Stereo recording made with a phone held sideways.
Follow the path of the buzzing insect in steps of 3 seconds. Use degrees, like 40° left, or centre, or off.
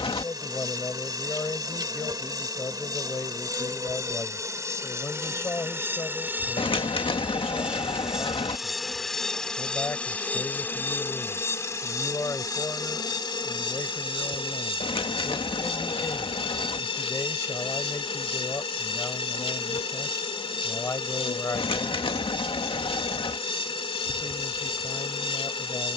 30° right, 20° right, 10° right, 10° left, 30° left, 40° left, 40° left, 40° left, 40° left.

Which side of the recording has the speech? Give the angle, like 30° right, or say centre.
20° left.